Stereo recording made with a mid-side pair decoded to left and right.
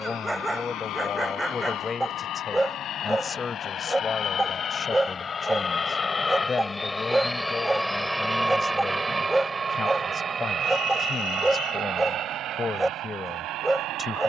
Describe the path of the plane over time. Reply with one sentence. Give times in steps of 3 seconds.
You can hear the plane on the left from 0 s, in the centre from 6 s and on the right from 9 s.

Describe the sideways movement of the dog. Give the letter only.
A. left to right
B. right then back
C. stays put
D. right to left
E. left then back
C.